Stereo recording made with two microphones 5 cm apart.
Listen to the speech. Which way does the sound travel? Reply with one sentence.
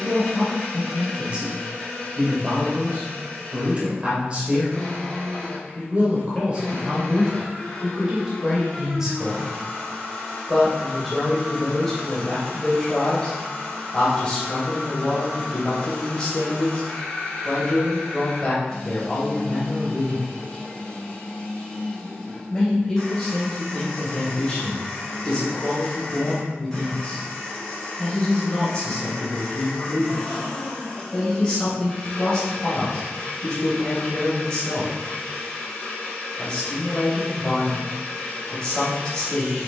In this clip you hear the speech travel towards the left.